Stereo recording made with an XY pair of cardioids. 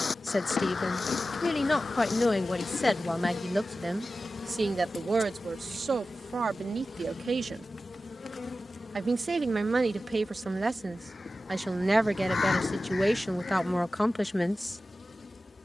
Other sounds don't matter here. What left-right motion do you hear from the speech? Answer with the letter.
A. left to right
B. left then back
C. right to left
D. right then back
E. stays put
D.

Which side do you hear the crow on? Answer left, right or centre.
left.